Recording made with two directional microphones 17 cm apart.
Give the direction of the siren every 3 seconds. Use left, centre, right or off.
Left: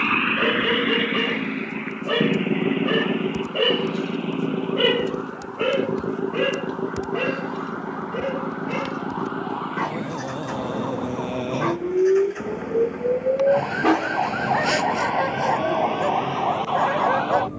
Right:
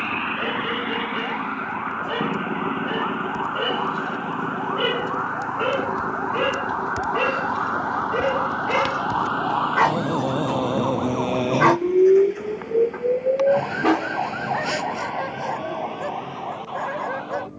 right, right, right, right, centre, left.